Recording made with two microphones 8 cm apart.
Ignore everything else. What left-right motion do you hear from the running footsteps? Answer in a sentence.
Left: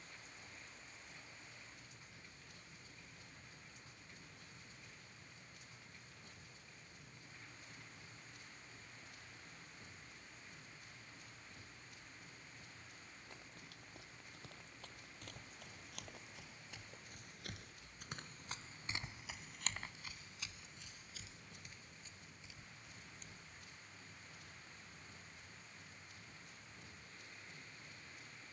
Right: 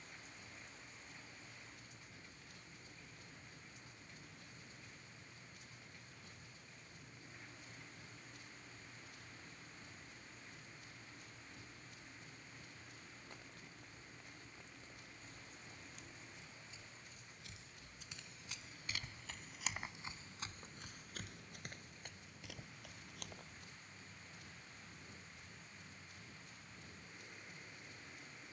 In this clip you hear the running footsteps move from left to right.